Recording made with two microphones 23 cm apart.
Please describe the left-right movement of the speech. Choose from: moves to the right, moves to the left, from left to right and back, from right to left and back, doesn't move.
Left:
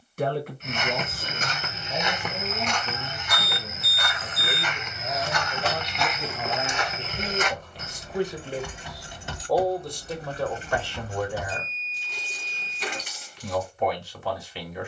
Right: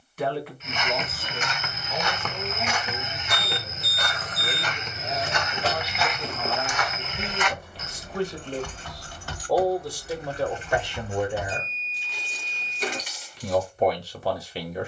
moves to the right.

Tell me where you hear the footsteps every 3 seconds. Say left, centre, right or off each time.
left, right, left, off, off.